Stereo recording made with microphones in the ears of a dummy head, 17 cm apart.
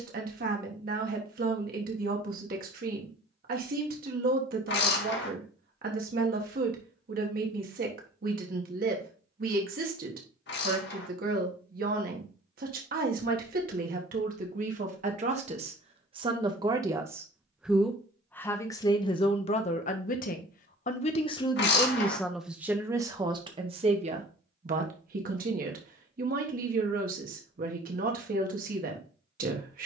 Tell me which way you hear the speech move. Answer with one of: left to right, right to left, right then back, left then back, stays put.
left then back.